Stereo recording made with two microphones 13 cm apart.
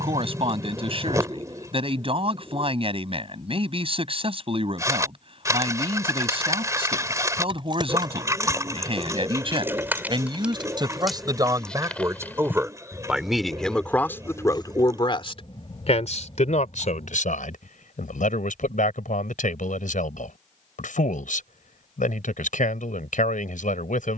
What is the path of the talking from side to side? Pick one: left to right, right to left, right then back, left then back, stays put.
right to left.